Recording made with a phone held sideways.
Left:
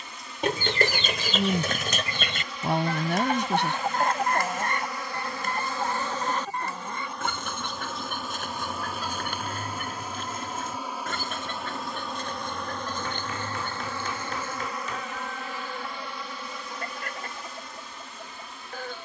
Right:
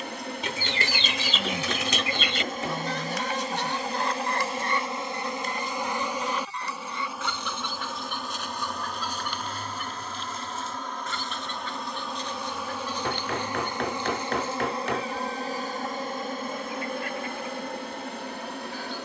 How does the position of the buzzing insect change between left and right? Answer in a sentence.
In this clip you hear the buzzing insect move from right to left and back again.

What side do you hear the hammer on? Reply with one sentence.
You can hear the hammer on the right.